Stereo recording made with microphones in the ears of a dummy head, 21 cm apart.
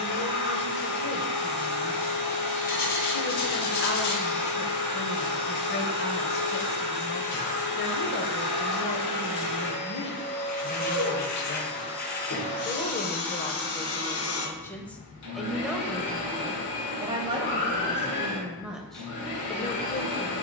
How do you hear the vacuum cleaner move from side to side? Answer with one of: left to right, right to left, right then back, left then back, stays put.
stays put.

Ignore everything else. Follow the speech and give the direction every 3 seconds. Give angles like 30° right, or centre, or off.
40° left, 40° left, 40° left, 40° left, 20° left, 10° right, 10° left.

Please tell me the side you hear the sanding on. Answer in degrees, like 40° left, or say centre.
40° left.